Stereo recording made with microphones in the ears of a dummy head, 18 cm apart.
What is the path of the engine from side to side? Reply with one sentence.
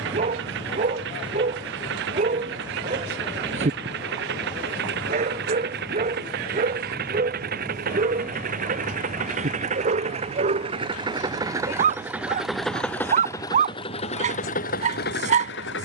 In this clip you hear the engine travel towards the left.